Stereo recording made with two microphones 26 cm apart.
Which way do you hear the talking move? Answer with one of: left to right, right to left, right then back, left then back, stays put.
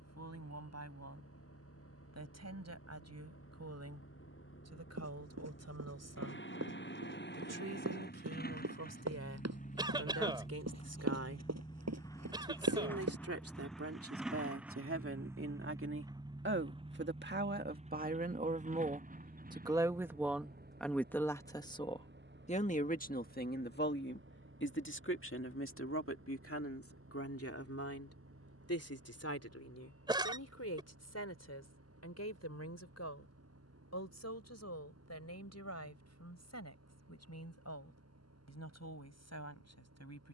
right to left.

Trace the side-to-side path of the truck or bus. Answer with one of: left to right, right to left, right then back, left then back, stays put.
left to right.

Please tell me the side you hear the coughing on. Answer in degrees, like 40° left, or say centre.
20° right.